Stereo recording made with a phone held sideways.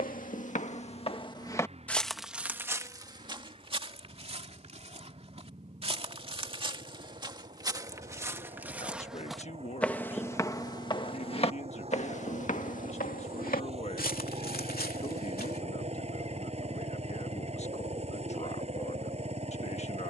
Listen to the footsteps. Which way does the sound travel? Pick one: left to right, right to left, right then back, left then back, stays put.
right then back.